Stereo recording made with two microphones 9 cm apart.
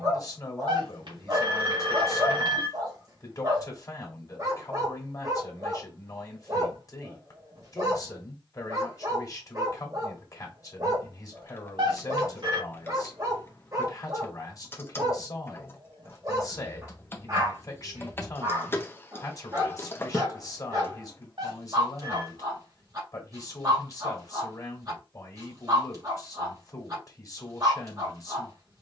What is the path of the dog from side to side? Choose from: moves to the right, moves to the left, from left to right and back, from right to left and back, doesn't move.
doesn't move.